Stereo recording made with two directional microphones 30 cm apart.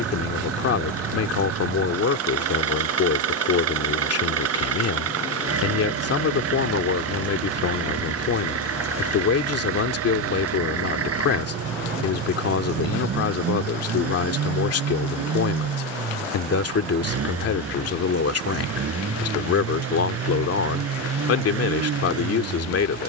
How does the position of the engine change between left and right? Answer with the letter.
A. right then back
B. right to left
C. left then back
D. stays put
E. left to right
D.